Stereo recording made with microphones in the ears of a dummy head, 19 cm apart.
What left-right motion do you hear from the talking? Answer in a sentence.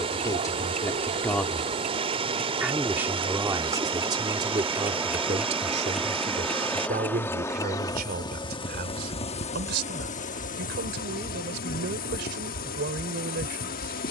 You can hear the talking go from the left side to the right.